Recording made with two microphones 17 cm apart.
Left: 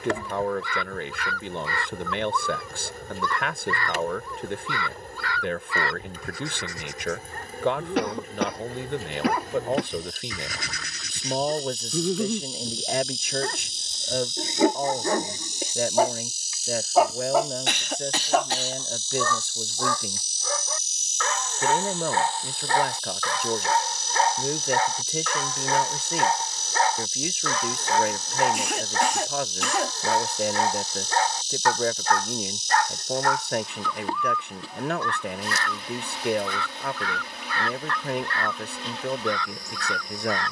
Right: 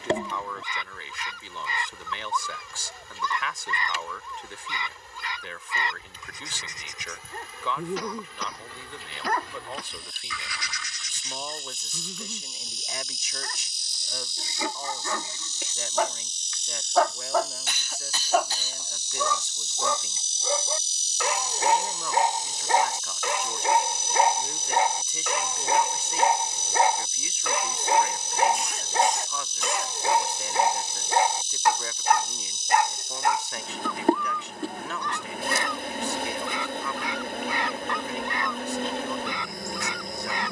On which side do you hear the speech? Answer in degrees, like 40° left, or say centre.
60° left.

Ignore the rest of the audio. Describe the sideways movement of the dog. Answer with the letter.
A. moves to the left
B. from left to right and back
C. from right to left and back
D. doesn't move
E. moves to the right
C.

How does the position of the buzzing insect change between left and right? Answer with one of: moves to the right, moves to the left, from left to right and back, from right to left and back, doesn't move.
moves to the right.